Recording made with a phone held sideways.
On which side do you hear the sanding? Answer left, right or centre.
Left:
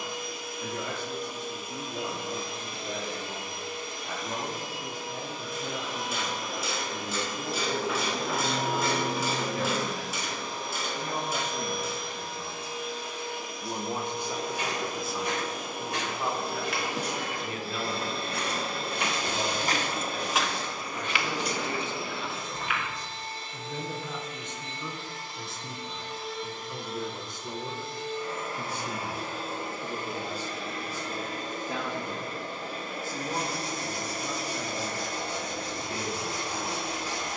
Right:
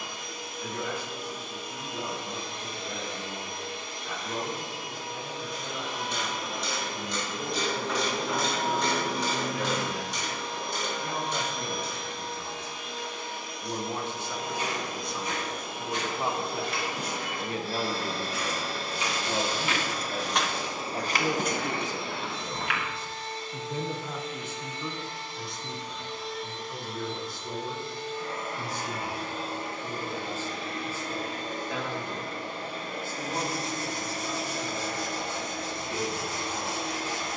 left.